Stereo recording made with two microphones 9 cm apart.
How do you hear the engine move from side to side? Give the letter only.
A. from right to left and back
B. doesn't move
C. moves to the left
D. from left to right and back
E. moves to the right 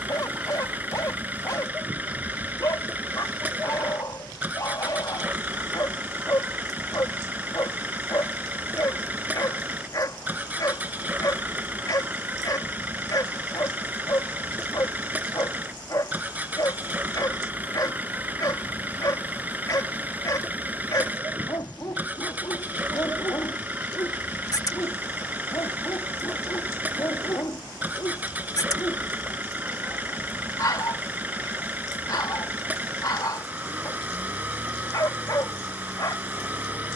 B.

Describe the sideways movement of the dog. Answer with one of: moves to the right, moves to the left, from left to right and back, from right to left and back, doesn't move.
doesn't move.